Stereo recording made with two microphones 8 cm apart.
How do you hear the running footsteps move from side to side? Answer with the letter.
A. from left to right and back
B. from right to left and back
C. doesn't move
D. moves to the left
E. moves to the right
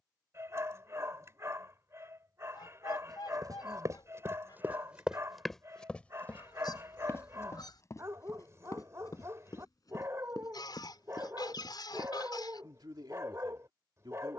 D.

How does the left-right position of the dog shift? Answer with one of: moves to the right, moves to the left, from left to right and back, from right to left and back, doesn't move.
doesn't move.